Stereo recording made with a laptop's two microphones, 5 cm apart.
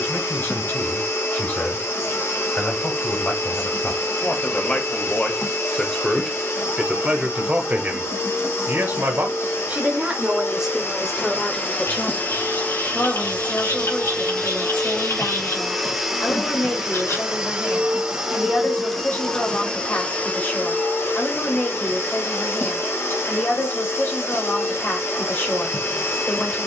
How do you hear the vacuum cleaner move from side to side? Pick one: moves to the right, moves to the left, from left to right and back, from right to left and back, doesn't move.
from left to right and back.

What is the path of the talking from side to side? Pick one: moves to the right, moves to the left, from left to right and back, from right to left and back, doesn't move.
from left to right and back.